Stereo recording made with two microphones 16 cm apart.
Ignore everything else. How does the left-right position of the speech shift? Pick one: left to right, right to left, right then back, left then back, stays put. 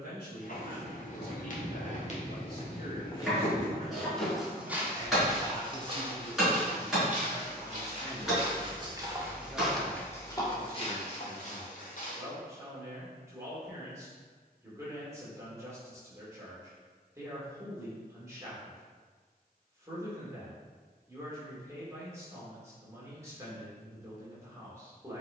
left to right.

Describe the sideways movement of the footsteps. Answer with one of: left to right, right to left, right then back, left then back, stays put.
right then back.